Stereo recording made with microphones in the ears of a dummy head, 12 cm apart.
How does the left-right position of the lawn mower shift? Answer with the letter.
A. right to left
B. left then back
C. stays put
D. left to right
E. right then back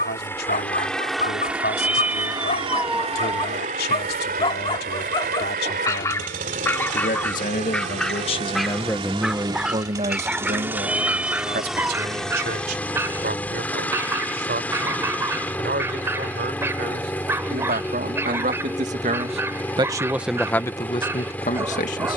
E.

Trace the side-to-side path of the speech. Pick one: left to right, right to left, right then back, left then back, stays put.
right then back.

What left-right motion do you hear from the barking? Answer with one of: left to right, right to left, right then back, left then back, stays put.
left to right.